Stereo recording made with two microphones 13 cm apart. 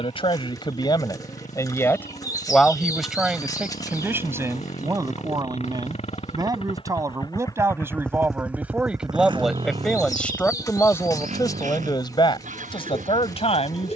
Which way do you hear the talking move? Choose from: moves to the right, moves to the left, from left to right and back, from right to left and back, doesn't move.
from left to right and back.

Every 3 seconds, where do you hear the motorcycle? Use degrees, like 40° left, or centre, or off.
80° left, 70° left, 20° left, 60° right, 80° right.